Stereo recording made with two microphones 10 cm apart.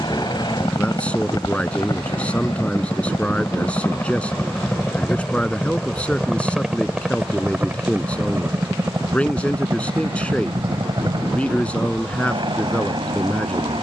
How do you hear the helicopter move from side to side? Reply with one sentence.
You can hear the helicopter travel towards the right.